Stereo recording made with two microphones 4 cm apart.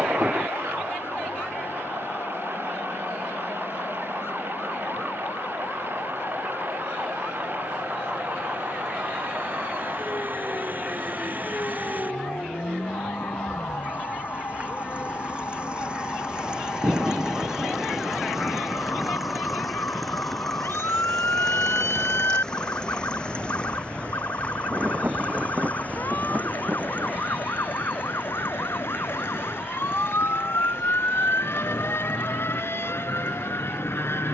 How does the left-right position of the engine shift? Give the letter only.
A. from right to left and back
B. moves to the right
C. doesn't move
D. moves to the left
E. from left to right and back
D.